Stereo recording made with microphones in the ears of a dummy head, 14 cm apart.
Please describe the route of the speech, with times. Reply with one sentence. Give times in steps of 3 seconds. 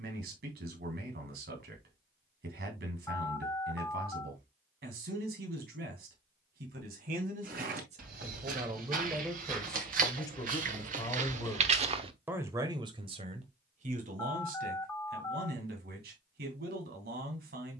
You can hear the speech on the right from 0 s, in the centre from 9 s and on the right from 12 s.